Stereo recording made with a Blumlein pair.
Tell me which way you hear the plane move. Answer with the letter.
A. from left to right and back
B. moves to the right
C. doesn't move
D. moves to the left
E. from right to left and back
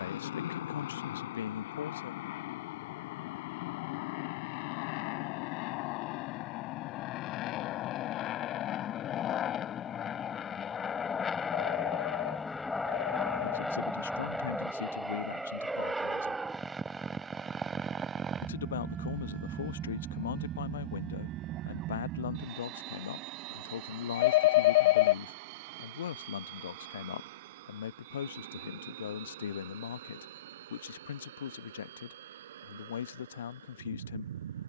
B.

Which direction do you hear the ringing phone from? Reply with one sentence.
In this clip you hear the ringing phone on the left.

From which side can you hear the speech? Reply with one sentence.
You can hear the speech on the left.